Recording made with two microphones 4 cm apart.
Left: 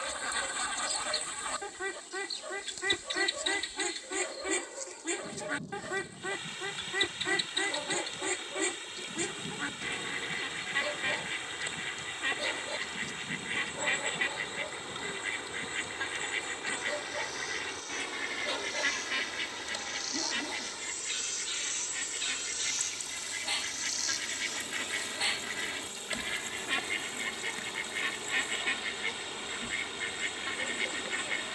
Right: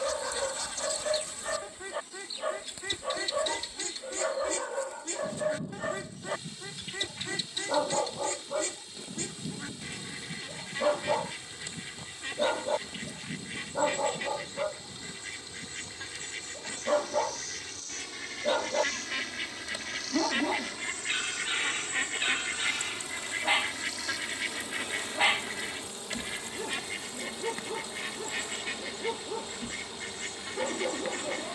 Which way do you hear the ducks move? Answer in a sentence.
You can hear the ducks go right and come back.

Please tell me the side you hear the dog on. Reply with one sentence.
In this clip you hear the dog on the right.